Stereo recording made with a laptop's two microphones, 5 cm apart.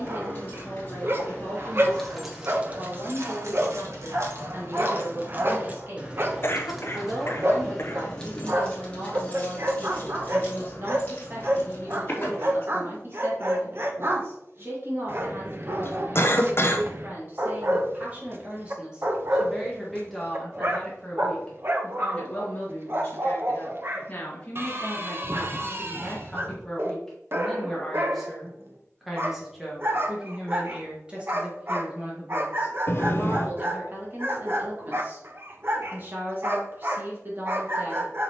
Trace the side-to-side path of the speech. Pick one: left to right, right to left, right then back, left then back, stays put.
left then back.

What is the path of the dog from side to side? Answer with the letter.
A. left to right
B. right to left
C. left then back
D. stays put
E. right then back
D.